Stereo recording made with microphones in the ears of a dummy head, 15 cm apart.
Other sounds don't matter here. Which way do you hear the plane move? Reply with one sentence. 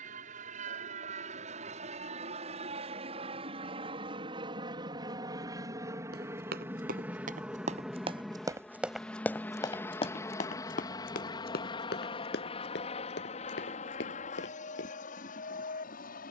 In this clip you hear the plane travel towards the left.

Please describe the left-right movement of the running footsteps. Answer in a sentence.
In this clip you hear the running footsteps move to the left.